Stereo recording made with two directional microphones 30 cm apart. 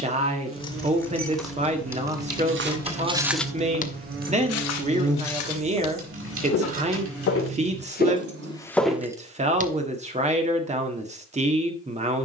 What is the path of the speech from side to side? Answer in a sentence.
In this clip you hear the speech stay put.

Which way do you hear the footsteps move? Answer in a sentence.
In this clip you hear the footsteps move from right to left and back again.